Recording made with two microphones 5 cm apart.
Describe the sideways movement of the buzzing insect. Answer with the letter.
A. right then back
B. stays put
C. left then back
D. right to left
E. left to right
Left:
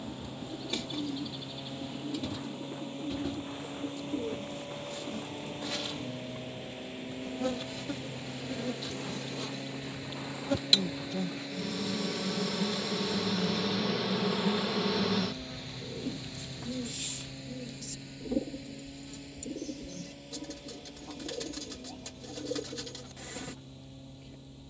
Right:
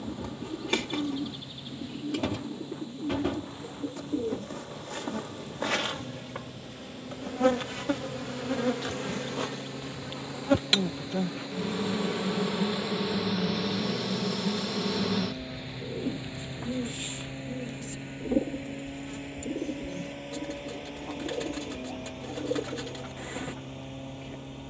C.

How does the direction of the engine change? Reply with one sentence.
In this clip you hear the engine move from left to right.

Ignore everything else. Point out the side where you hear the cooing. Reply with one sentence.
In this clip you hear the cooing on the right.